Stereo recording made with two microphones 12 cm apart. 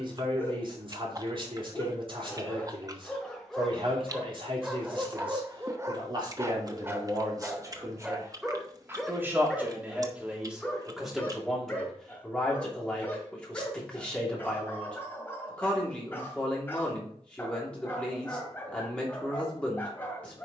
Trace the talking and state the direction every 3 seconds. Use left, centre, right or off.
right, right, right, centre, centre, centre, centre.